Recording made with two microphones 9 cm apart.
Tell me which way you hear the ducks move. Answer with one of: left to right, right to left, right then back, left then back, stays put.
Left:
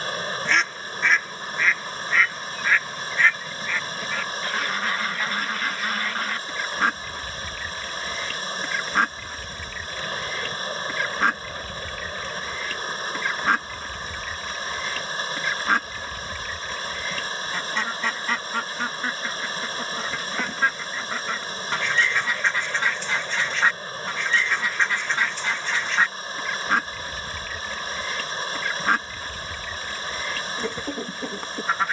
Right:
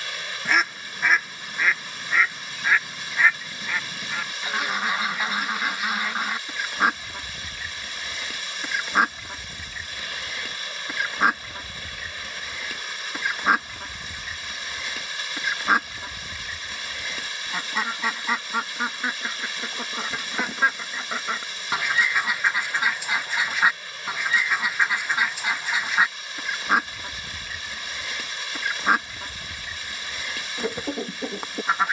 stays put.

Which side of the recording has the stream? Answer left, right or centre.
left.